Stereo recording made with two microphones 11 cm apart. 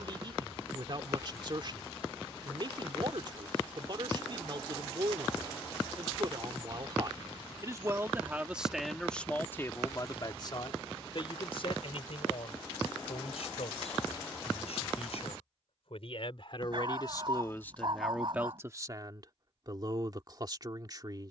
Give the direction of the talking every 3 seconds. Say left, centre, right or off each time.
right, right, right, left, left, left, right.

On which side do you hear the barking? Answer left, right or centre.
right.